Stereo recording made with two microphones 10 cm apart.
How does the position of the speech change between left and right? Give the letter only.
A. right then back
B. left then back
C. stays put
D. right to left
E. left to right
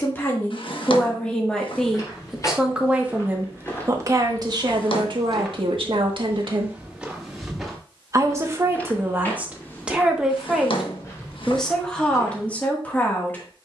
A.